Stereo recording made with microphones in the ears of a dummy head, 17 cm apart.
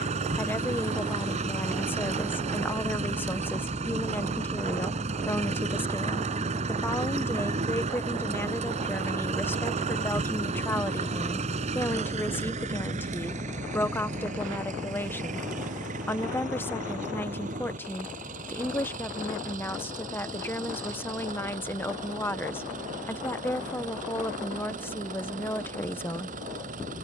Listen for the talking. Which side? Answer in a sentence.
You can hear the talking in the centre.